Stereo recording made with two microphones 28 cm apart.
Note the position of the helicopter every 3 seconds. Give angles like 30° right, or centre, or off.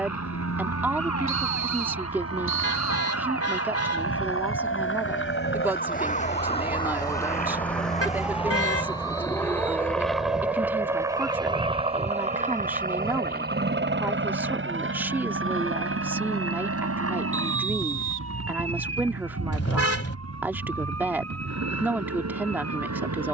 60° left, 50° left, 30° left, centre, 30° right, 50° right, 60° right, 70° right.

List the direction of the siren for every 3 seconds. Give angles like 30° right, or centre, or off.
70° left, 50° left, 10° left, 20° right, 40° right, 50° right, 50° right, 60° right.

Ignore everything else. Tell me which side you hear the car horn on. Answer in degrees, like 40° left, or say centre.
50° left.